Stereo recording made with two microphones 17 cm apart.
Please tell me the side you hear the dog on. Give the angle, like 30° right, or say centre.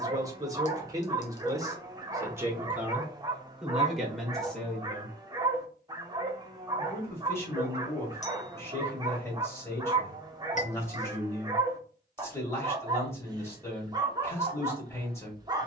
20° right.